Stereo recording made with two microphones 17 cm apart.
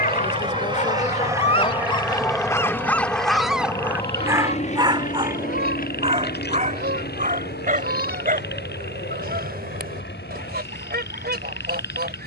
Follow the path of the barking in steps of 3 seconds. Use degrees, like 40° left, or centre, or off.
30° left, 10° right, 50° right, 60° right.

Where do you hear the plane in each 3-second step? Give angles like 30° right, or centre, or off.
10° right, 40° left, 60° left, 70° left.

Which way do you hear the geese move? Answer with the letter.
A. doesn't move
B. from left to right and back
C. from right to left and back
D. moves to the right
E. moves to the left
A.